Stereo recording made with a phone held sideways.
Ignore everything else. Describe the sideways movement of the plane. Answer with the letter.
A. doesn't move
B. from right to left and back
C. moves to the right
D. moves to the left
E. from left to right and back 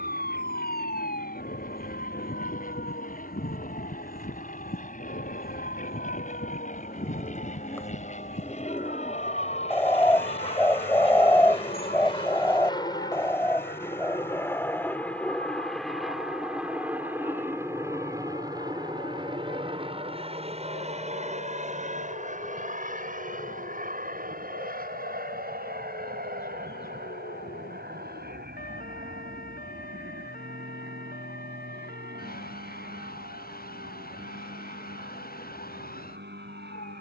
C.